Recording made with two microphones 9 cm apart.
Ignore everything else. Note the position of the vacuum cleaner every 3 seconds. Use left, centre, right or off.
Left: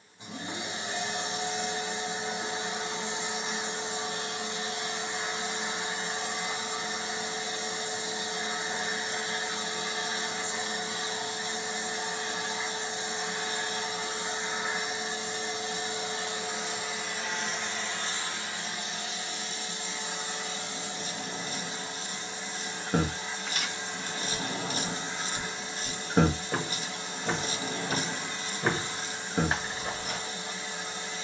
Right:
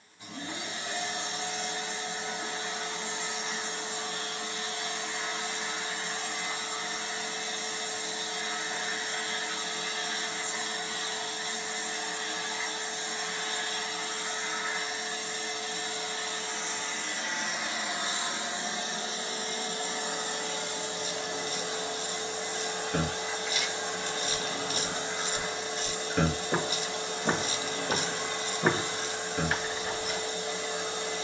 left, left, left, left, left, centre, right, right, right, right, right.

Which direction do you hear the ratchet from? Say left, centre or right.
left.